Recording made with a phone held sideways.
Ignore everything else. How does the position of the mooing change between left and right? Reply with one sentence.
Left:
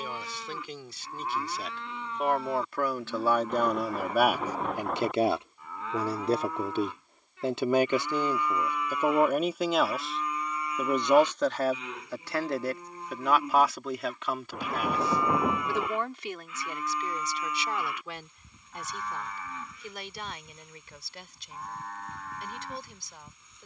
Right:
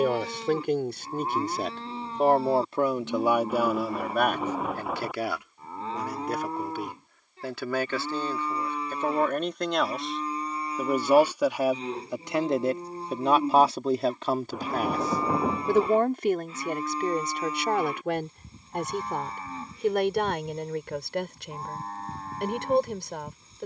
You can hear the mooing stay put.